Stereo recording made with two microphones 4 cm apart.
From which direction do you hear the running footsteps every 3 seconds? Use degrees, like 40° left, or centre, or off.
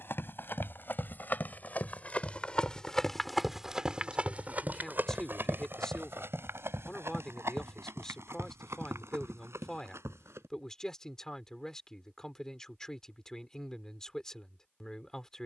40° left, 30° right, 70° right, 80° right, off.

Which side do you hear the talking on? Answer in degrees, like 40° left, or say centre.
10° left.